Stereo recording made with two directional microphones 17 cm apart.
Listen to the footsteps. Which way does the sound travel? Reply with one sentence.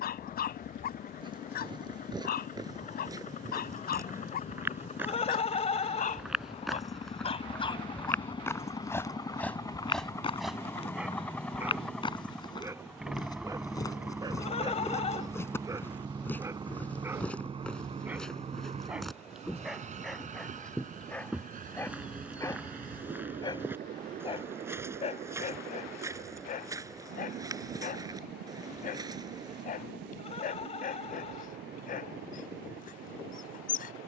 You can hear the footsteps move from right to left and back again.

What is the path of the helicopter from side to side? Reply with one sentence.
In this clip you hear the helicopter go from the left side to the right.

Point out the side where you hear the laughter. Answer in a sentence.
You can hear the laughter on the left.